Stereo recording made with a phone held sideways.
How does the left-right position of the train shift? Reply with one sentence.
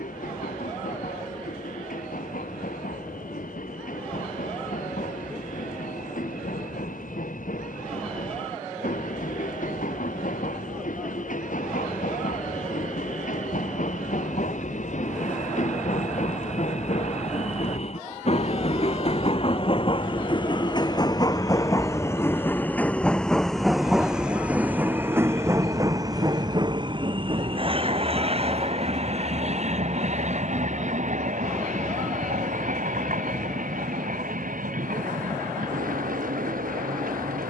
You can hear the train move from left to right.